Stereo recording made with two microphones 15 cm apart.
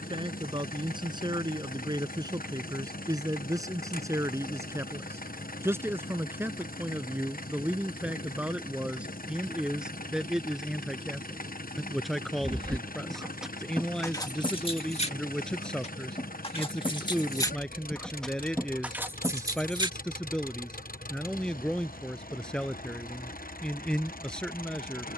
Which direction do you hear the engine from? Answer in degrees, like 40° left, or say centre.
80° left.